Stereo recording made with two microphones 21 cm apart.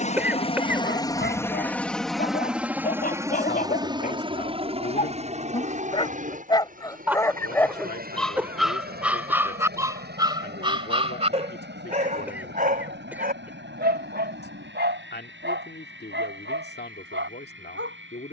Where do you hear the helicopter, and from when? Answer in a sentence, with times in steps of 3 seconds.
You can hear the helicopter in the centre from 0 s and on the right from 3 s.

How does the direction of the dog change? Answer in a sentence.
In this clip you hear the dog move from left to right.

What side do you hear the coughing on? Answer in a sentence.
You can hear the coughing in the centre.